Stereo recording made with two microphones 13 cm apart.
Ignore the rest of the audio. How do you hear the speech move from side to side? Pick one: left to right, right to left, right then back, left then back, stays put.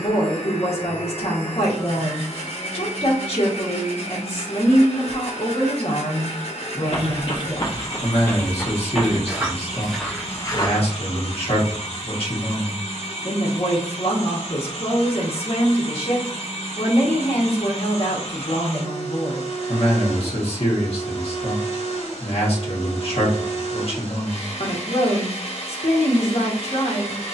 stays put.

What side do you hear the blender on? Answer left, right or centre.
left.